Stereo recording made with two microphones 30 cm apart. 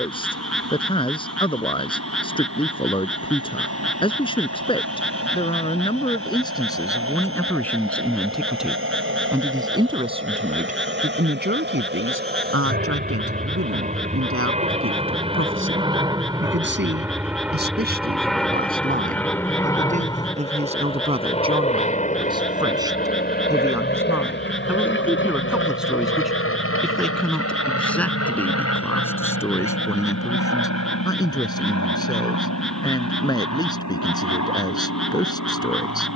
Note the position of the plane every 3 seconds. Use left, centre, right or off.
right, right, right, right, right, centre, centre, left, left, left, left, left.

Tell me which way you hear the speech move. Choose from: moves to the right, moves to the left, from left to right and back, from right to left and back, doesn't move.
from left to right and back.